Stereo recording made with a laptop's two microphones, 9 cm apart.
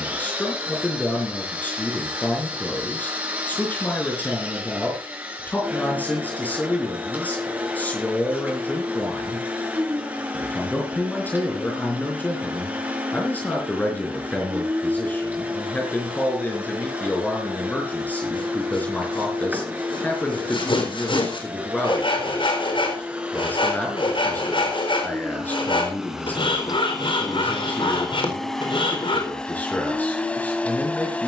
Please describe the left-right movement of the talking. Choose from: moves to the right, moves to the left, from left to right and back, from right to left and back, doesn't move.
doesn't move.